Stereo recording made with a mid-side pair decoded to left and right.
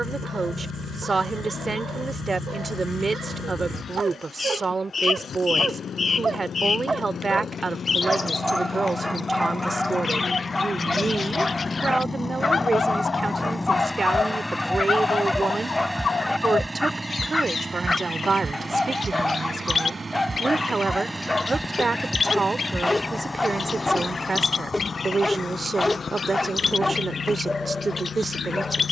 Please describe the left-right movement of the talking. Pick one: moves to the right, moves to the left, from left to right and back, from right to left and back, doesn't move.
doesn't move.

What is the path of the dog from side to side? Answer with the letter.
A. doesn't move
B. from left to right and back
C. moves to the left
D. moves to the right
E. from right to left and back
C.